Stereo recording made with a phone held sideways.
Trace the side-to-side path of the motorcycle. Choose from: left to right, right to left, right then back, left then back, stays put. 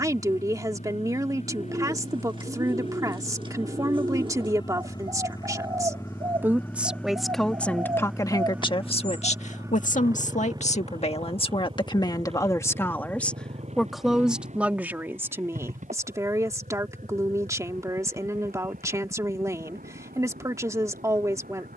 left to right.